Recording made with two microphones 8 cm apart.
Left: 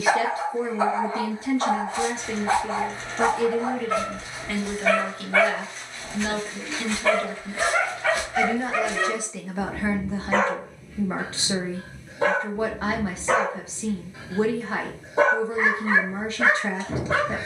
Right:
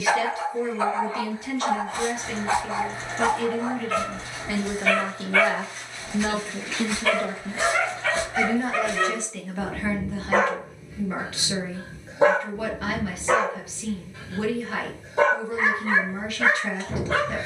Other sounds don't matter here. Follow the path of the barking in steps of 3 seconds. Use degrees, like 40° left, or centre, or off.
20° left, 20° left, 20° left, 10° right, centre, 20° left.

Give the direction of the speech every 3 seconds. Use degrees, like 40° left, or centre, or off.
30° left, 10° right, 20° right, 20° left, 30° left, 30° left.